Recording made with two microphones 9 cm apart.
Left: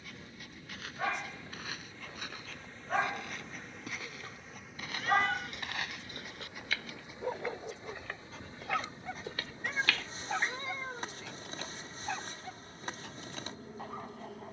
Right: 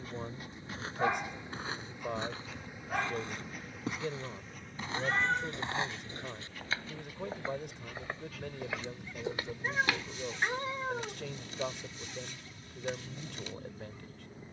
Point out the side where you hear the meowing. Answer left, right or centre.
right.